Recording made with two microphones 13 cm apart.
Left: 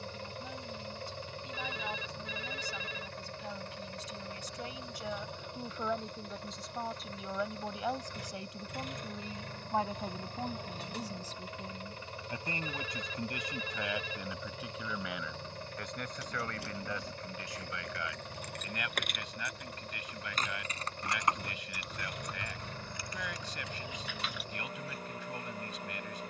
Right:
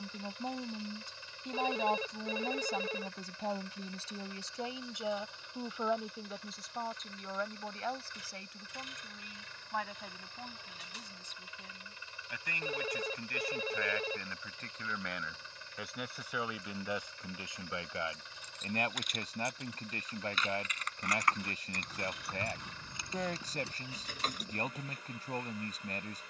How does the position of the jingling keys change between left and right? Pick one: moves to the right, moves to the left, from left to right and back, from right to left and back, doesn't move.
moves to the right.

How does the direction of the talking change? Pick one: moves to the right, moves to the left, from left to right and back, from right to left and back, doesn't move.
from right to left and back.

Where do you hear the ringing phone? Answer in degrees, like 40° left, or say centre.
40° right.